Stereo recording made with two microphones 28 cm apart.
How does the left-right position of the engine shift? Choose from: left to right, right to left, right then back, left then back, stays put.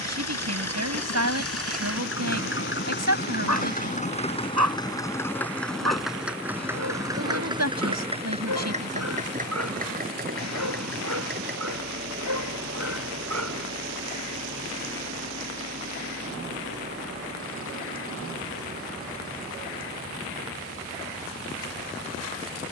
left to right.